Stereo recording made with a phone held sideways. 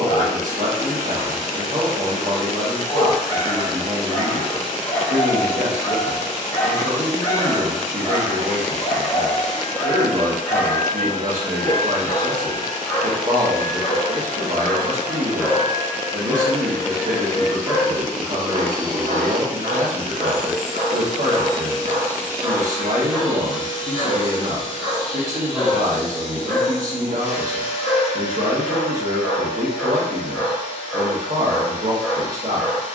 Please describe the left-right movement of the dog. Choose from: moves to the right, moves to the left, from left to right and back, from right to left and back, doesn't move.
from left to right and back.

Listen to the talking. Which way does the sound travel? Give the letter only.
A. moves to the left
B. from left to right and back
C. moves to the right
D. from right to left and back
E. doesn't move
E.